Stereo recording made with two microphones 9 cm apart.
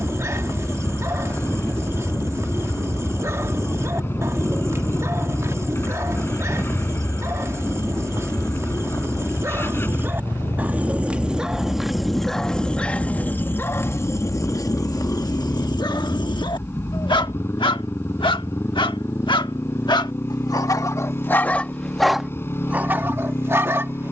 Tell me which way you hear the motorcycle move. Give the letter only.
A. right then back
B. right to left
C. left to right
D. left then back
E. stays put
E.